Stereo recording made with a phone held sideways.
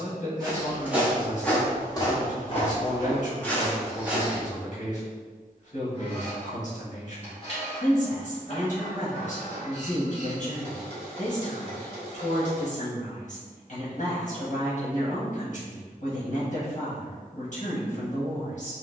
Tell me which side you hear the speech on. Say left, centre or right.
left.